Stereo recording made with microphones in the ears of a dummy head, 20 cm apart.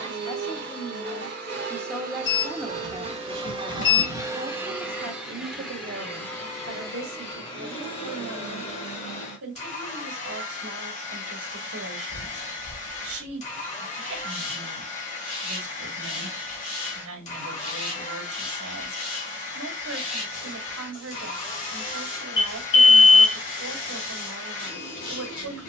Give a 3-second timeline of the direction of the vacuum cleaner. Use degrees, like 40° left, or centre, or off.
50° right, 10° right, 20° left, 30° left, 30° left, 30° left, 30° left, 30° left, 30° left.